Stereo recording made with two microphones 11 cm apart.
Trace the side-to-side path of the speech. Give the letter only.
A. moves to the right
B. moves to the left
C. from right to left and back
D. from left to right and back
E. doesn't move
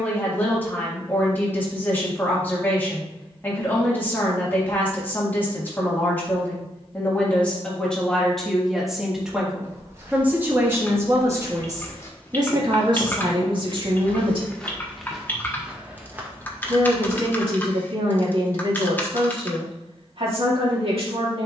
A.